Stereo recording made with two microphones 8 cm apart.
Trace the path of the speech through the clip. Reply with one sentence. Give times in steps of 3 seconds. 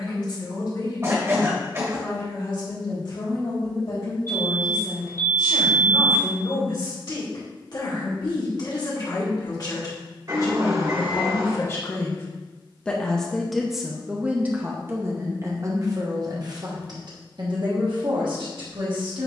You can hear the speech on the left from 0 s, in the centre from 12 s and on the right from 15 s.